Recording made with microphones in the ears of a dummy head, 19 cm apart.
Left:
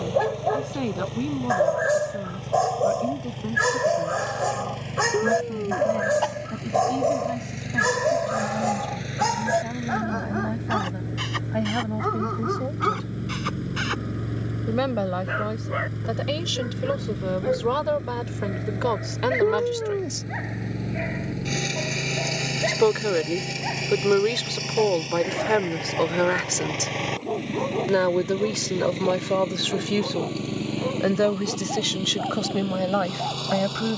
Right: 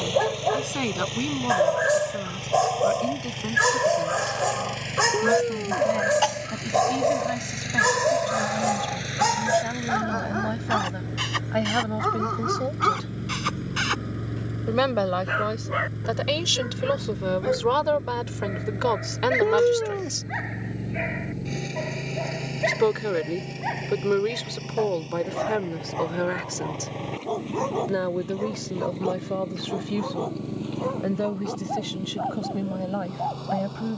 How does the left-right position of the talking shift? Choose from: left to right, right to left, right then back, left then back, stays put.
right to left.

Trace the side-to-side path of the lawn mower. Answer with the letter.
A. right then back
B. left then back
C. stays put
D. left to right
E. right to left
E.